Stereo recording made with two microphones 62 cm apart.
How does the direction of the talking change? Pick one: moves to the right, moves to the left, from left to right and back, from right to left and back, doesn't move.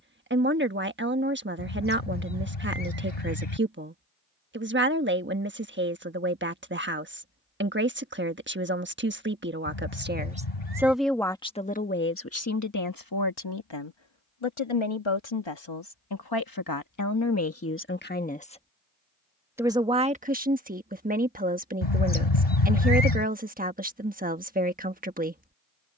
from right to left and back.